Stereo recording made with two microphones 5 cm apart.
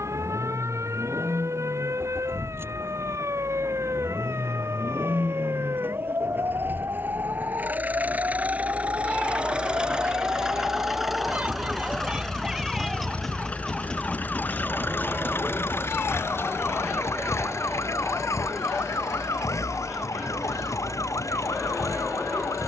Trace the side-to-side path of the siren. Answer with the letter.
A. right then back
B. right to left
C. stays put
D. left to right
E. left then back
B.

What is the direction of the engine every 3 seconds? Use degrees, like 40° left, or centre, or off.
50° right, 50° right, 30° right, 10° right, 30° left, 60° left, 70° left, 80° left.